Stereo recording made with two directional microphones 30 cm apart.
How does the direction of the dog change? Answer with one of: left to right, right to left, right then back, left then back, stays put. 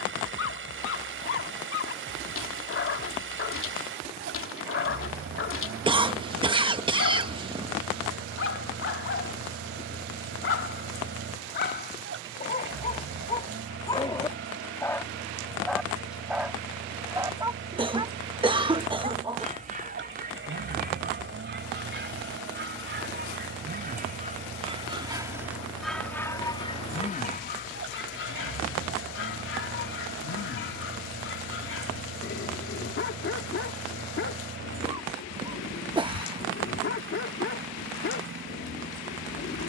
right then back.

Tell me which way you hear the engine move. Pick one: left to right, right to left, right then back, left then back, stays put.
stays put.